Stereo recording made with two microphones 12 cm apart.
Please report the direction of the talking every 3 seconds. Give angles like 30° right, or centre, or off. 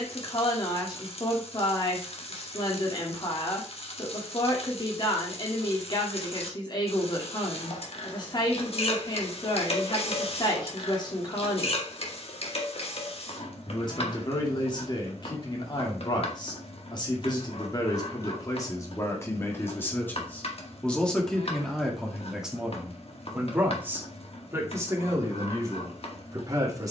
40° left, 40° left, 40° left, 40° left, 40° left, 40° left, 20° left, centre, 30° right.